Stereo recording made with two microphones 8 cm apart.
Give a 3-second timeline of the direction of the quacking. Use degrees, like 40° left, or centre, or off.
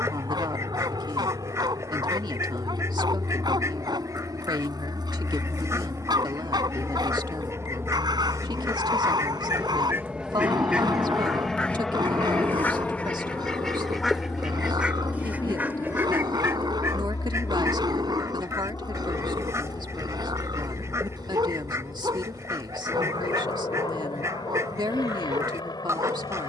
40° right, 40° right, 40° right, 20° right, 10° left, 30° right, 40° right, 40° right, 40° right.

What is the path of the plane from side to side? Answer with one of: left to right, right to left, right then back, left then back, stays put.
right to left.